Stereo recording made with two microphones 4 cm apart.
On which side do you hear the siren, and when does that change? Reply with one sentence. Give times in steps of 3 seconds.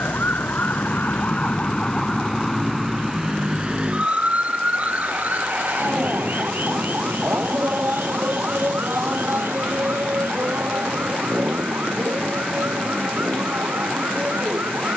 You can hear the siren on the left from 0 s and on the right from 3 s.